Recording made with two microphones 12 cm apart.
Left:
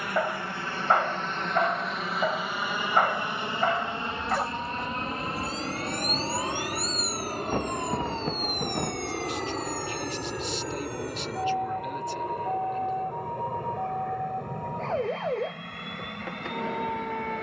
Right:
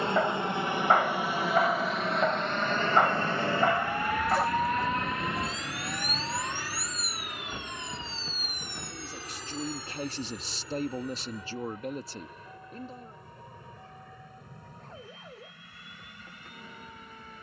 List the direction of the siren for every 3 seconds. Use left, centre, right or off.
right, right, left, left, left, left.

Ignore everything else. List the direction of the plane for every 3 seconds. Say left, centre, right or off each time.
centre, left, left, left, left, left.